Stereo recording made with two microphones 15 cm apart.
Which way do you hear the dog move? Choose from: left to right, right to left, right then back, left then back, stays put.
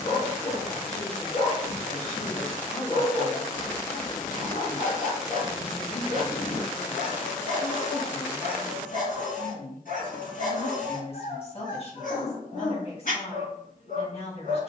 stays put.